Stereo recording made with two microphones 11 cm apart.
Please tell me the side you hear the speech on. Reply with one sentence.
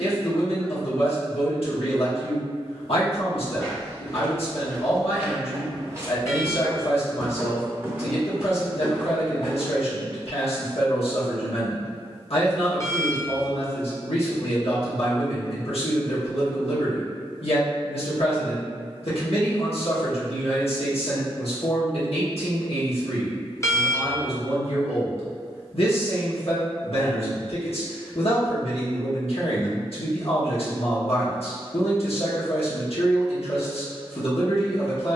You can hear the speech on the left.